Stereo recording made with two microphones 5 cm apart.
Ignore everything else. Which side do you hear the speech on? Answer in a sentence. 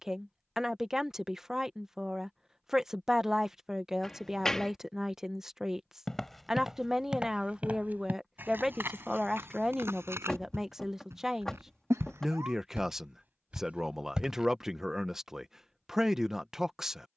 In this clip you hear the speech in the centre.